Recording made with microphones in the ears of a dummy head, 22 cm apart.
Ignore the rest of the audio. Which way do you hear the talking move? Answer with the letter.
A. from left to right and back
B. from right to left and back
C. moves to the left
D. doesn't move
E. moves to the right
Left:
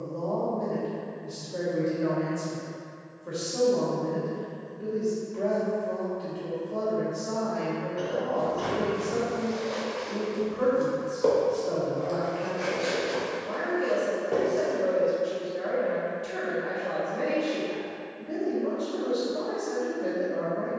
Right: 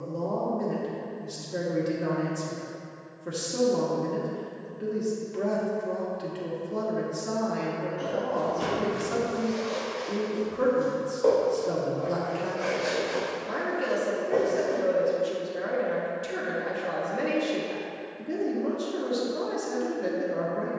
D.